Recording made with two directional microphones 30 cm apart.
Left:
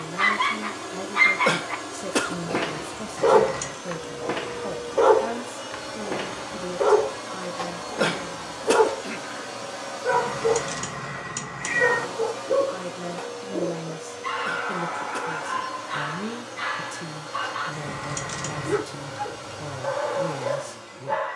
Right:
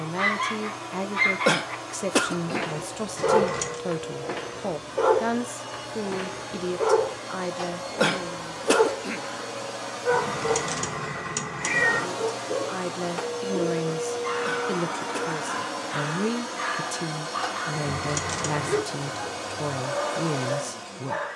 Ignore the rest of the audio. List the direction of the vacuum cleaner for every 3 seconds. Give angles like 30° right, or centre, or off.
20° left, 20° left, 10° left, 10° right, 40° right, 60° right, 60° right.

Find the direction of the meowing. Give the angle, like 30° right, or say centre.
20° right.